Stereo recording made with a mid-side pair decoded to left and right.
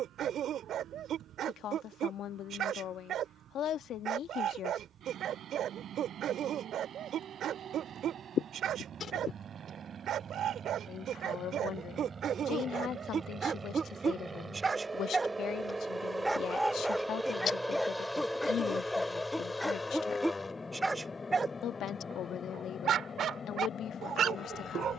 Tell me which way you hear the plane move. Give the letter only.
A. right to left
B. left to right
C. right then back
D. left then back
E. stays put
A.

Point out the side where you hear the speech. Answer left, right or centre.
left.